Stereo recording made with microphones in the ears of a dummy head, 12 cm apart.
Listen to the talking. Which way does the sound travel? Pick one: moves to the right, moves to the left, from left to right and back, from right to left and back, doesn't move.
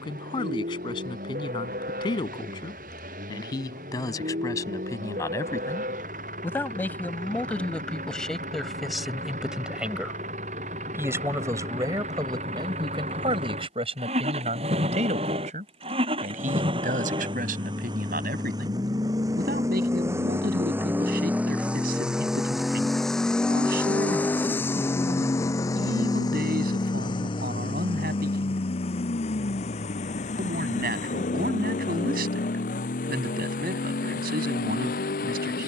moves to the right.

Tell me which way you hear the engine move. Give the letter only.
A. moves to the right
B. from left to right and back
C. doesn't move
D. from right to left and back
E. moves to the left
E.